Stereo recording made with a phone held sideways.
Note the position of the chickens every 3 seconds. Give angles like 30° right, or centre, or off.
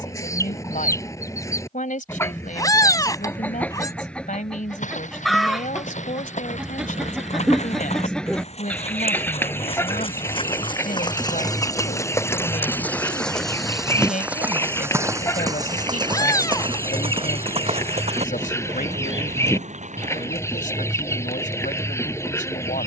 20° left, centre, centre, 20° left, 20° left, 20° left, 20° left, 20° left.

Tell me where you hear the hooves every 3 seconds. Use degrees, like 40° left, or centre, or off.
off, 60° left, 60° left, 40° left, centre, 40° right, 60° right, off.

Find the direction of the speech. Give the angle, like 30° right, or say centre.
70° left.